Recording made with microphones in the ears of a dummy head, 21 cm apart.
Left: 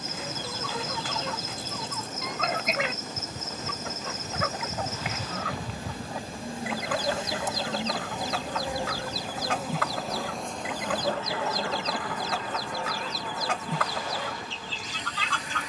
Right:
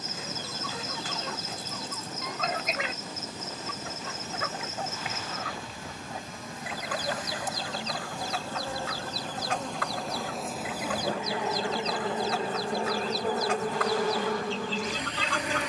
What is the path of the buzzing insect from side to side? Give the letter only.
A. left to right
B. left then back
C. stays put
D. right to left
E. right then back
A.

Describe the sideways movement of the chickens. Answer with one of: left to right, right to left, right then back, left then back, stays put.
stays put.